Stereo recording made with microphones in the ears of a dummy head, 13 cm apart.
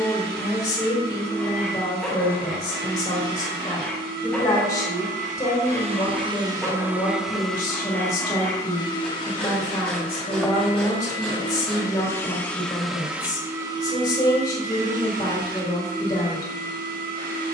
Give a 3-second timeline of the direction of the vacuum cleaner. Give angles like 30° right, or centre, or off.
80° right, 60° right, centre, 30° left, 20° right, 70° right.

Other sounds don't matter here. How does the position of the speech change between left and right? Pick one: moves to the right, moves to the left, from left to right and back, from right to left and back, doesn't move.
doesn't move.